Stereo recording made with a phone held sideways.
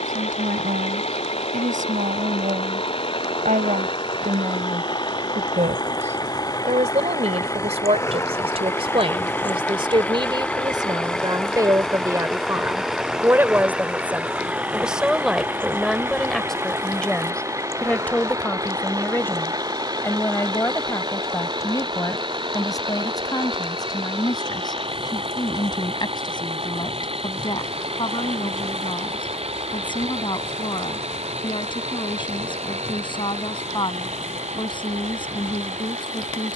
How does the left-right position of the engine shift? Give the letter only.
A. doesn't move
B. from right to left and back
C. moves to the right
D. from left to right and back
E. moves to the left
C.